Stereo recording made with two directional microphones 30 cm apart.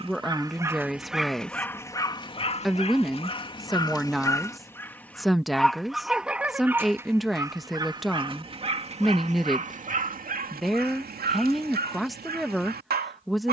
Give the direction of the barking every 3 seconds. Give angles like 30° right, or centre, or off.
centre, 10° left, 10° right, 30° right, 30° right.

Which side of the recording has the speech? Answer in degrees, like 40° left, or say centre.
centre.